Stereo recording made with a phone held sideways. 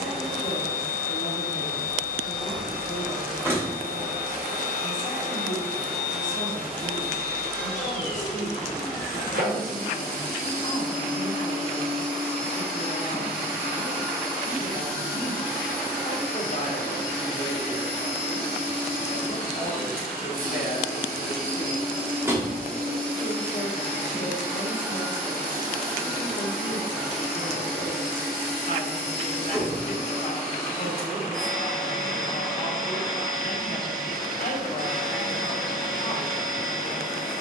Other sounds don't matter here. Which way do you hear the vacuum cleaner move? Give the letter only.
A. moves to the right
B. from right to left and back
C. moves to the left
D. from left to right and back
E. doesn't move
E.